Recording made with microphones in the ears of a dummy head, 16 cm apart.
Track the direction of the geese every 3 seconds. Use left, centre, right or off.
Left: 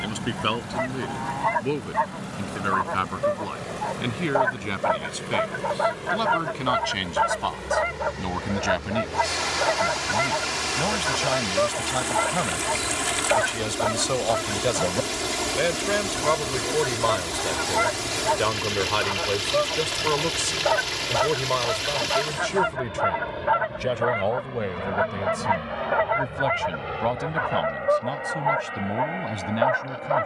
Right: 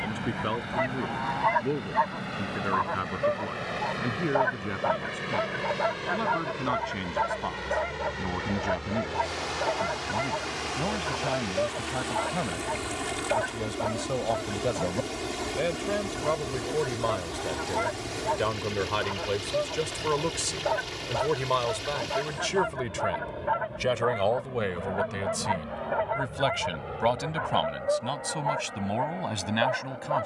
centre, centre, left, left, left, left, left, left, left, left.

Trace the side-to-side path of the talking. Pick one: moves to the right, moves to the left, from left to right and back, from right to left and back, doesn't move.
moves to the right.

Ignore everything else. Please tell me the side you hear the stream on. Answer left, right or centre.
left.